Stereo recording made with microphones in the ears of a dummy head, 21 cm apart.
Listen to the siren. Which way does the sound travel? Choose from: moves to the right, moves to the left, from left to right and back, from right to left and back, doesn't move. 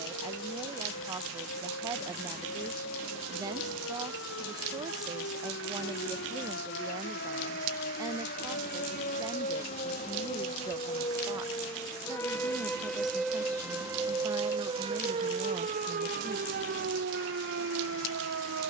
moves to the right.